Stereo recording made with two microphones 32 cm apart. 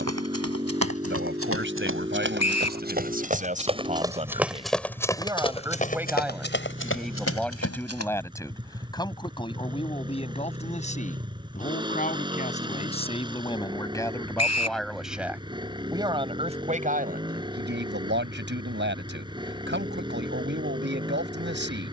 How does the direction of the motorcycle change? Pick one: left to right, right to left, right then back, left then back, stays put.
stays put.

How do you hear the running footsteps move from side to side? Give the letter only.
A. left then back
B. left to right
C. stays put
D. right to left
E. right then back
D.